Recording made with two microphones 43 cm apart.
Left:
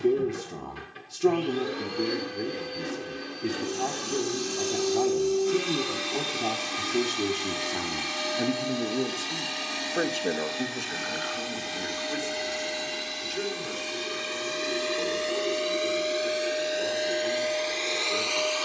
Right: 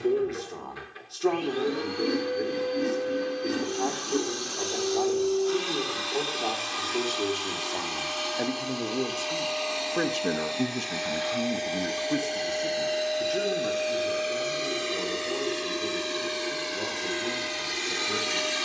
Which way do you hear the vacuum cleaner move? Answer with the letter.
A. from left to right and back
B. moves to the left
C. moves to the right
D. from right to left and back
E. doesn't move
C.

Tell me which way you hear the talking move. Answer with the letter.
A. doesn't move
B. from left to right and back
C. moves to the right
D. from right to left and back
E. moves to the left
C.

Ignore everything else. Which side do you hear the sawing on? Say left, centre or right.
right.